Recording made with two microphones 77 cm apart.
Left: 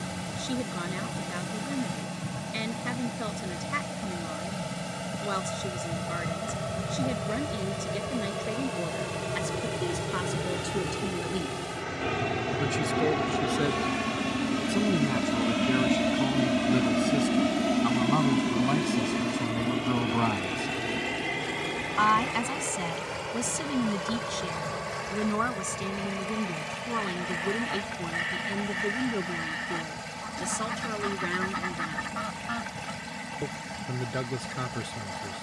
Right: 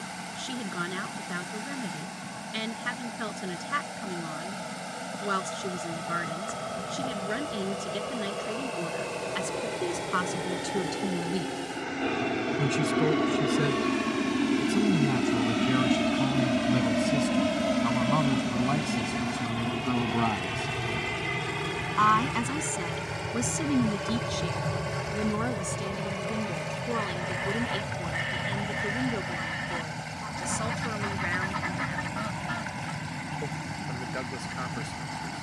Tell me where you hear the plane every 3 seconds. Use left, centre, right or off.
left, left, left, left, left, centre, right, right, right, right, right, right.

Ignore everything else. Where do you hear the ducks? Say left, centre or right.
centre.